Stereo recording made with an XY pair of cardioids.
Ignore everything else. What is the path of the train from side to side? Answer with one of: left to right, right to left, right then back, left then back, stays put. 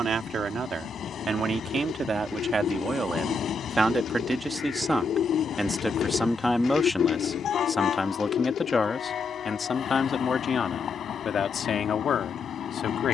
stays put.